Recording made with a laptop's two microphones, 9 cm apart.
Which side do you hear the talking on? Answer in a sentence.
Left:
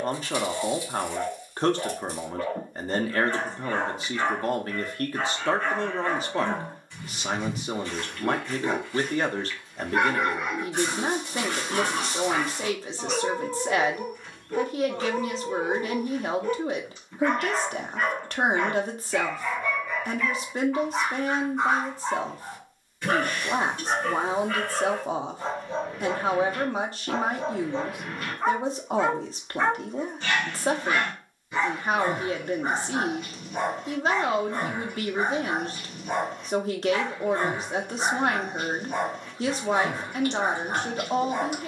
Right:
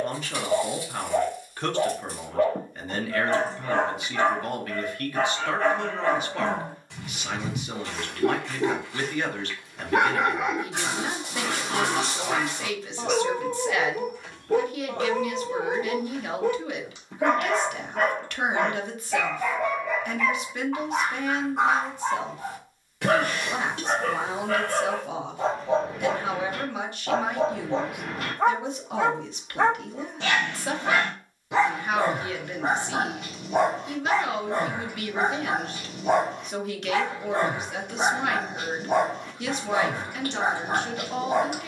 You can hear the talking on the left.